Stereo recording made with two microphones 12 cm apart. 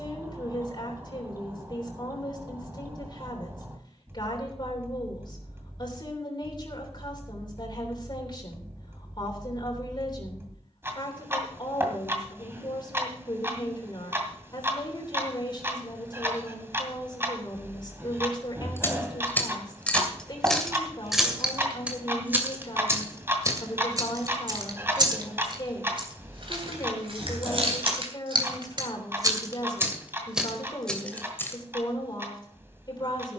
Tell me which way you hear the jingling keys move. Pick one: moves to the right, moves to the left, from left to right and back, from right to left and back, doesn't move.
from left to right and back.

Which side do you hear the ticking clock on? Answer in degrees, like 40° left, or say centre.
20° right.